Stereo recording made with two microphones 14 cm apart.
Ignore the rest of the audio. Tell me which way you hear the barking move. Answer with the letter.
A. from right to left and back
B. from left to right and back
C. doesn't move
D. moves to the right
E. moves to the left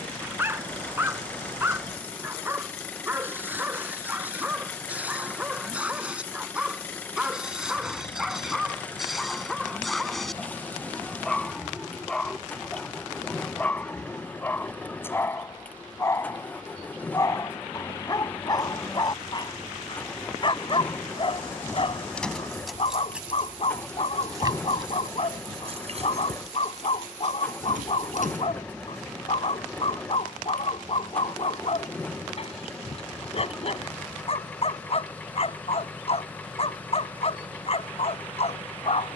E.